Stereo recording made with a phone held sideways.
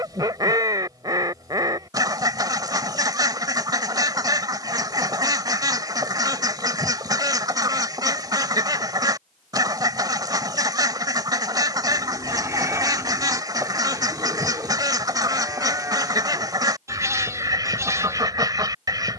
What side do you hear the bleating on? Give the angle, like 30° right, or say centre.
20° right.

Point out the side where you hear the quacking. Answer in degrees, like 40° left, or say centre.
30° right.